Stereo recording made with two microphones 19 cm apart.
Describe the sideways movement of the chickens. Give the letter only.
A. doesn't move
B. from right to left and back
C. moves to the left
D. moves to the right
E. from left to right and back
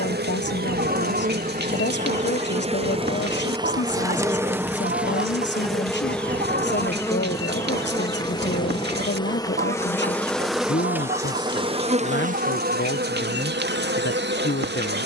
A.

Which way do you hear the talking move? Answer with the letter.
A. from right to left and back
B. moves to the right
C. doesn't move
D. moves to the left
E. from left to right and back
C.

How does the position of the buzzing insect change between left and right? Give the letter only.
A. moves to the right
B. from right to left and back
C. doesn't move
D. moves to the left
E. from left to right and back
B.